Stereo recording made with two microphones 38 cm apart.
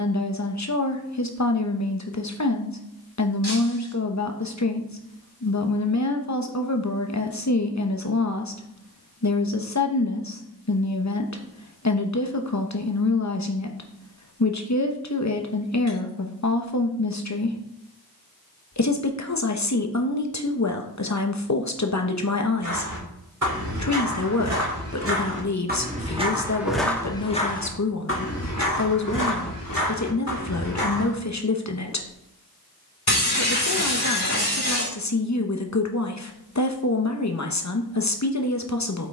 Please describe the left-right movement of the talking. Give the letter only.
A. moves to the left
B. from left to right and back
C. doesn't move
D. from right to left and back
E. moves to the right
C.